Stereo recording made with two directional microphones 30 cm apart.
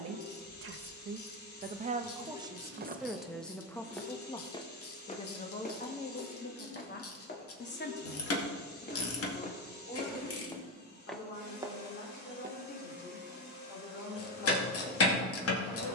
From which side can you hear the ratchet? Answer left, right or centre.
left.